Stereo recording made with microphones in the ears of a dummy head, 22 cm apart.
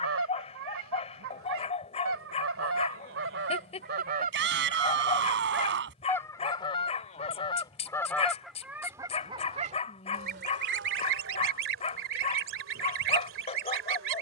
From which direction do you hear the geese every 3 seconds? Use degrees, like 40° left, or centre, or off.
60° right, 30° right, 10° left, 40° right, 50° right.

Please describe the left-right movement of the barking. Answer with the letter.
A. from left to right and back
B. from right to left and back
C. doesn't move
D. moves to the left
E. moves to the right
C.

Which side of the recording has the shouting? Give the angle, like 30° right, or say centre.
50° right.